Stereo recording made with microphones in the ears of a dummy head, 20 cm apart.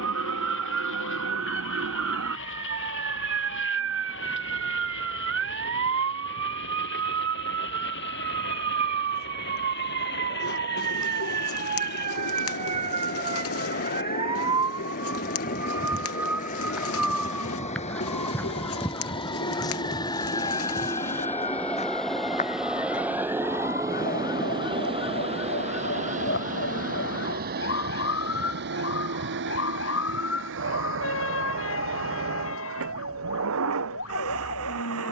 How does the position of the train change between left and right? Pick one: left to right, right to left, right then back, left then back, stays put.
left to right.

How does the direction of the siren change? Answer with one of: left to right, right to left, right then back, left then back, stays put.
right to left.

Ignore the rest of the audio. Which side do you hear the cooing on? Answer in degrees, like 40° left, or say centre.
70° left.